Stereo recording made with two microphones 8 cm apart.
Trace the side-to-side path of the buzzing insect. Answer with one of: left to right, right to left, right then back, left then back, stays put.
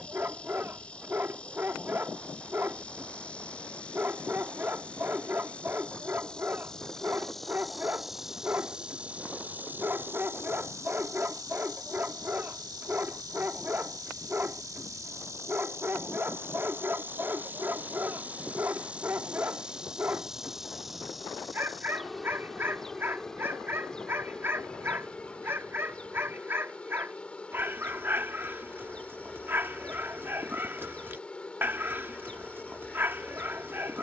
right then back.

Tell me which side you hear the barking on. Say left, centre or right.
right.